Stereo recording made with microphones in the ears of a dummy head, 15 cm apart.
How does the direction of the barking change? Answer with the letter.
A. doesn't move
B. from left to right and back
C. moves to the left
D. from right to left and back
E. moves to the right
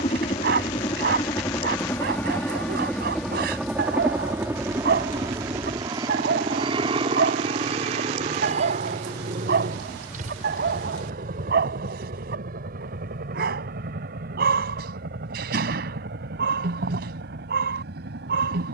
A.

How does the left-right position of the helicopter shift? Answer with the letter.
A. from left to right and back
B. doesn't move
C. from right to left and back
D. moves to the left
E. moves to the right
E.